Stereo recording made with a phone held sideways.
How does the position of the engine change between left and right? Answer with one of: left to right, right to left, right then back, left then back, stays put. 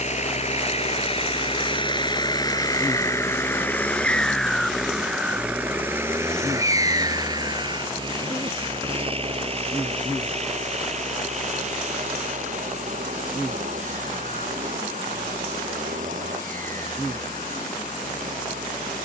left to right.